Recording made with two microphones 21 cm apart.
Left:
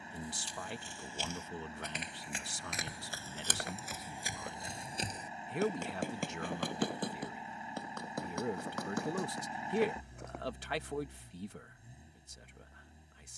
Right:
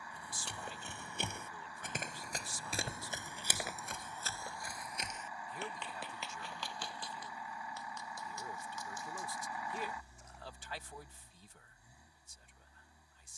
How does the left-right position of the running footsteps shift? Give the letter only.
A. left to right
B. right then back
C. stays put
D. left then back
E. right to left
E.